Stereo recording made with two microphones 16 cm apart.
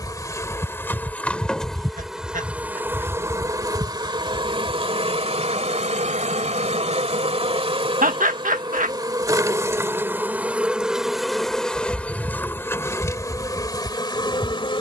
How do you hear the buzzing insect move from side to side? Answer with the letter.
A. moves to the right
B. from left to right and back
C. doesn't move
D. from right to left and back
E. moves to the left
B.